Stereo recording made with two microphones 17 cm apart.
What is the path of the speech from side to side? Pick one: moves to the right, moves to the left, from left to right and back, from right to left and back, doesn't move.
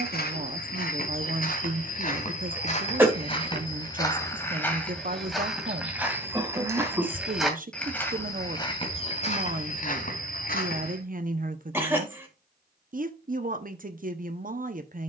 doesn't move.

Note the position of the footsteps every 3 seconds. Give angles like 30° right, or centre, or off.
50° left, 10° left, centre, 50° left, off.